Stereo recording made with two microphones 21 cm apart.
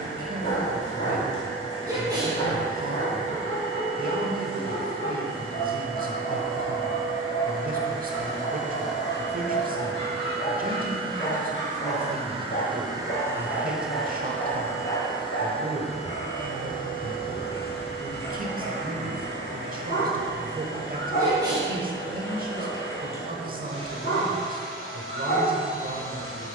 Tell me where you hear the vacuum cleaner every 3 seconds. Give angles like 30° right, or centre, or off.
70° right, 70° right, 60° right, 50° right, 10° right, 40° left, 60° left, 70° left, 70° left.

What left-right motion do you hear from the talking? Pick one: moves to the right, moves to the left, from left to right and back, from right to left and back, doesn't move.
doesn't move.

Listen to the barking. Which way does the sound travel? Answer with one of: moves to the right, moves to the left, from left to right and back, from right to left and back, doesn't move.
doesn't move.